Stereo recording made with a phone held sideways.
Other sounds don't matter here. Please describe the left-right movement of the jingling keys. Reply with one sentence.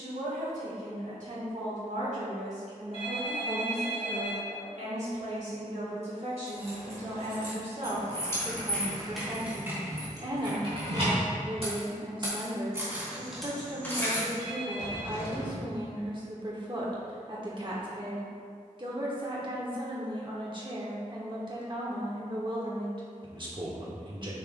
In this clip you hear the jingling keys go right and come back.